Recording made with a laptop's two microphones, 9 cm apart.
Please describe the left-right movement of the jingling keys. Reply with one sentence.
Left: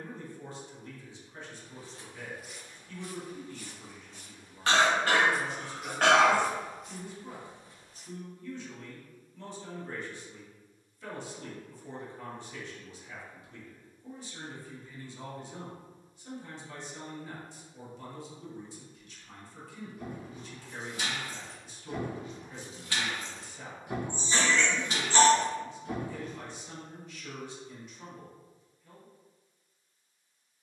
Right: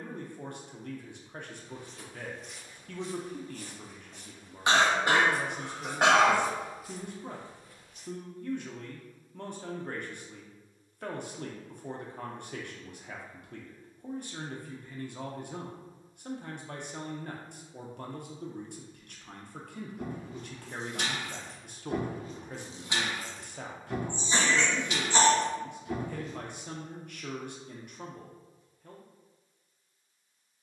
You can hear the jingling keys travel towards the left.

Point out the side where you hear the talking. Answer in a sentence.
You can hear the talking on the right.